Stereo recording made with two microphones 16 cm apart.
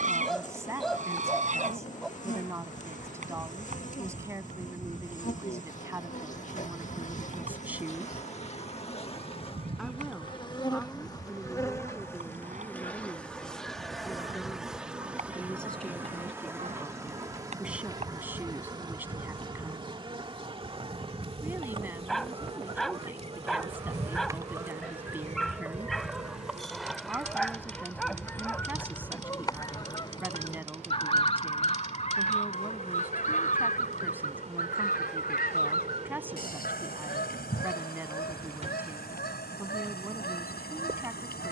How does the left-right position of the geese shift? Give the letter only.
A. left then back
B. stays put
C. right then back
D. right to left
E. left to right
D.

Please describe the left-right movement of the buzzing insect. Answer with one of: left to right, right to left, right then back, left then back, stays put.
left to right.